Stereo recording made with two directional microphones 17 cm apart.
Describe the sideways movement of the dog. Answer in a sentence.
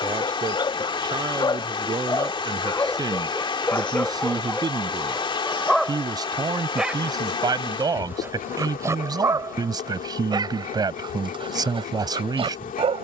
You can hear the dog move from left to right.